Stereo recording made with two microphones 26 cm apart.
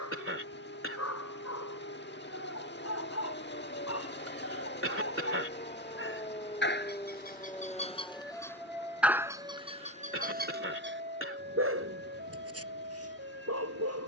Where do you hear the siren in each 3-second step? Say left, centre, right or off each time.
left, left, centre, right, right.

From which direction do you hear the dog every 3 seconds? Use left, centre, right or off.
left, left, left, right, right.